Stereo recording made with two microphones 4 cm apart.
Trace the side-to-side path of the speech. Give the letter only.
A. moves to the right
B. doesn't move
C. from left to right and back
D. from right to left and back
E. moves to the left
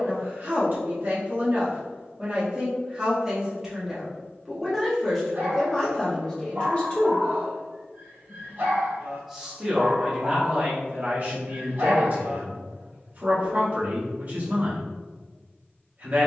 D.